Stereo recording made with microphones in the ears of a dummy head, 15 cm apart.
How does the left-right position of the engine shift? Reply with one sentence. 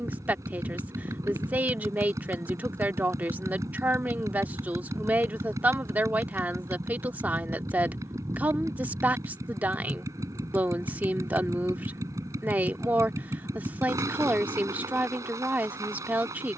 You can hear the engine stay put.